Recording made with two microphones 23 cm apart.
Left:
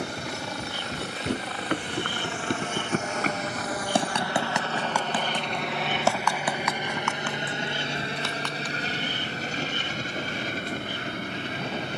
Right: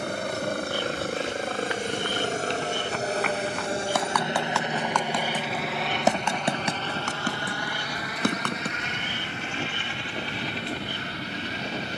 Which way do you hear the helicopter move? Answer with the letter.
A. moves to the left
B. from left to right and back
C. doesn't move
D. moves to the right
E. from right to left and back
A.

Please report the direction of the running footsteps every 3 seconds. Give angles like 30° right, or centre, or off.
60° left, 20° left, 40° right, off.